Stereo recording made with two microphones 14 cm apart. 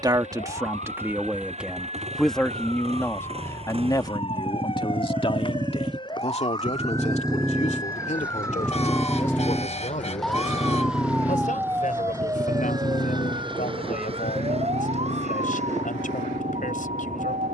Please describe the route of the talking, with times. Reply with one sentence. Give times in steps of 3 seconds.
In this clip you hear the talking in the centre from 0 s and on the left from 3 s.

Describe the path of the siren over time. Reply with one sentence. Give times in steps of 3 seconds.
You can hear the siren on the left from 0 s, in the centre from 9 s and on the right from 12 s.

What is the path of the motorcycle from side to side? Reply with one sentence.
You can hear the motorcycle move to the left.